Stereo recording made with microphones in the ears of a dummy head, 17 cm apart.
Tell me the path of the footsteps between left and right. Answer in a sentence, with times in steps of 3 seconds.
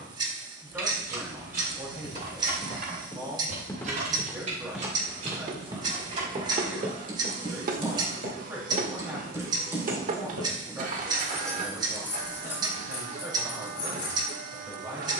In this clip you hear the footsteps on the left from 0 s, in the centre from 3 s, on the right from 6 s and not at all from 12 s.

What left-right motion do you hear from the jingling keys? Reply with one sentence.
You can hear the jingling keys move from right to left.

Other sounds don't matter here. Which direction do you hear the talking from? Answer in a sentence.
In this clip you hear the talking in the centre.